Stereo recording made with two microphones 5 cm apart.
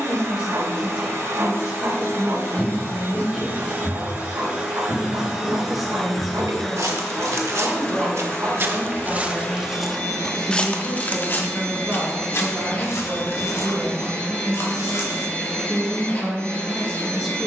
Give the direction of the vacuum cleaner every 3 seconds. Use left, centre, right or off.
right, right, centre, left, left, left.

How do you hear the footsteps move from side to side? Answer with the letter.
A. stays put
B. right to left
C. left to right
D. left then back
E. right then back
E.